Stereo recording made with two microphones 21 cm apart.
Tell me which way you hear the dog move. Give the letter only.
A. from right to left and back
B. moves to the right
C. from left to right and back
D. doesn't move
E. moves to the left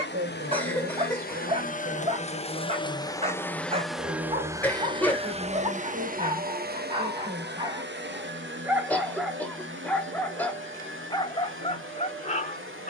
E.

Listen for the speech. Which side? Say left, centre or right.
right.